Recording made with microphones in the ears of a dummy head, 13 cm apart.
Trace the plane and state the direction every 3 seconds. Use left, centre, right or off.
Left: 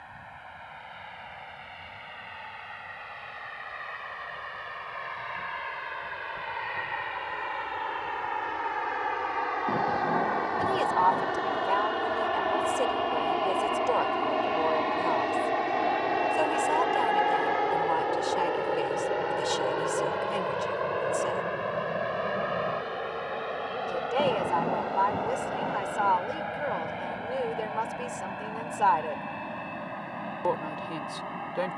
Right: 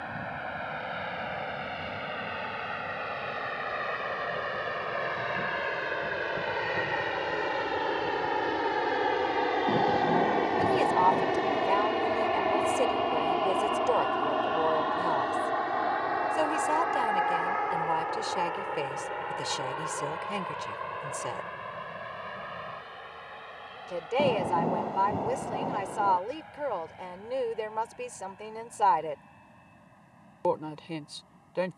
right, right, right, right, centre, left, left, left, left, left, left.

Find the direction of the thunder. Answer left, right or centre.
centre.